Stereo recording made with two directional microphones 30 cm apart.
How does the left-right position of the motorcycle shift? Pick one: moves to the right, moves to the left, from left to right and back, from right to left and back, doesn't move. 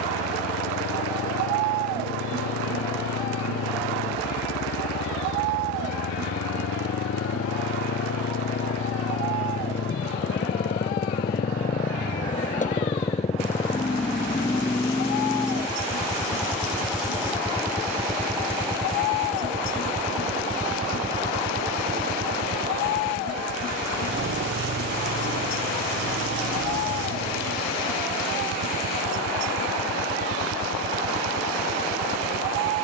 moves to the right.